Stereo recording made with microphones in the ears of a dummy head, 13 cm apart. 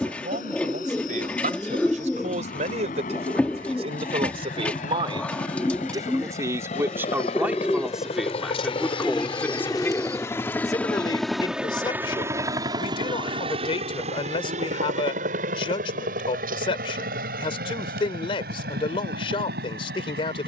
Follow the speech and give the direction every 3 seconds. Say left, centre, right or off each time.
right, right, centre, left, left, left, left.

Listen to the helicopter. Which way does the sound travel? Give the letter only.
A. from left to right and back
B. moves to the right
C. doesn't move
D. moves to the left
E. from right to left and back
B.